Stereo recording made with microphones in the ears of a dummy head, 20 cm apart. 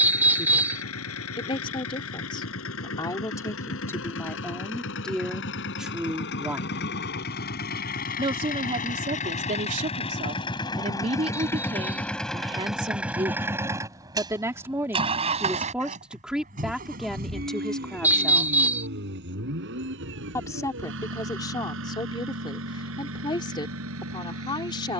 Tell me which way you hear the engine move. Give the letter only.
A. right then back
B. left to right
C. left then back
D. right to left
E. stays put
B.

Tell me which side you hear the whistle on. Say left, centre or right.
centre.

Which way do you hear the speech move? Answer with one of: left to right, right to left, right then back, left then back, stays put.
right then back.